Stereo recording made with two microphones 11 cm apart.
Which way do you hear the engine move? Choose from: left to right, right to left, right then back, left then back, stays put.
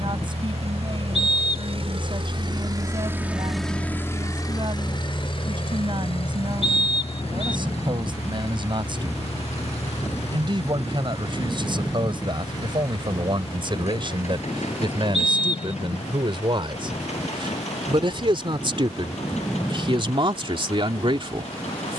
right to left.